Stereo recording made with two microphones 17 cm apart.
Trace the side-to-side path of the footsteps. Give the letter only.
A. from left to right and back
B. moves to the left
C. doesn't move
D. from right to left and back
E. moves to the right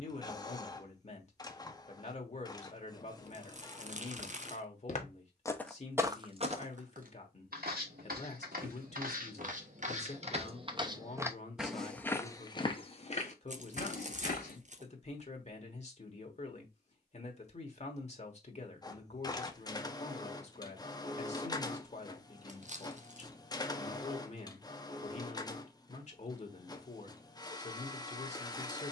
A.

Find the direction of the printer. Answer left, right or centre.
left.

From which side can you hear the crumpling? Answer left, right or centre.
right.